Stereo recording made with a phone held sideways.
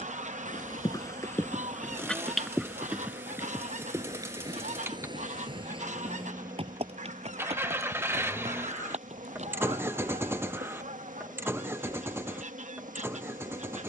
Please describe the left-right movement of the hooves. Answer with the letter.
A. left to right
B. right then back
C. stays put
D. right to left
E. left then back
A.